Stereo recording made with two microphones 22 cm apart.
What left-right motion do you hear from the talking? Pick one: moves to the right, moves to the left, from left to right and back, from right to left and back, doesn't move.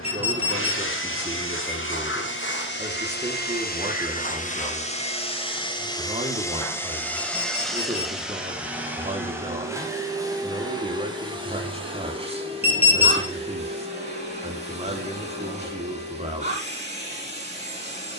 doesn't move.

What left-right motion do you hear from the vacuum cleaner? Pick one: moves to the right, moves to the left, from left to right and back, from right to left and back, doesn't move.
moves to the right.